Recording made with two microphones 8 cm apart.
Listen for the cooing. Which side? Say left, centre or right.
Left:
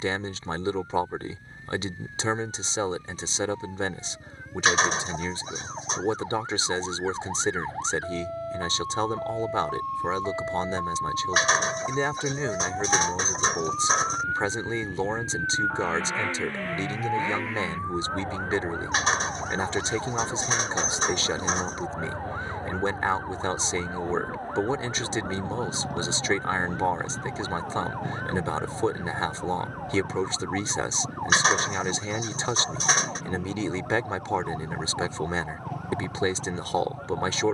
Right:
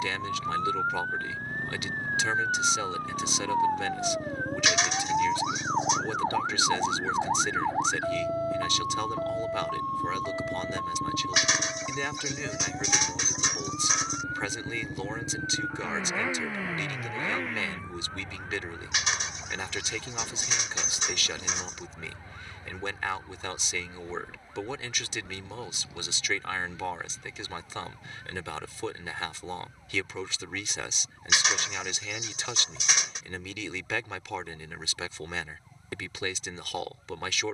left.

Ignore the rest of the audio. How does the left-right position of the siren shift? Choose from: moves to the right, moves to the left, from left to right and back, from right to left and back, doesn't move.
moves to the left.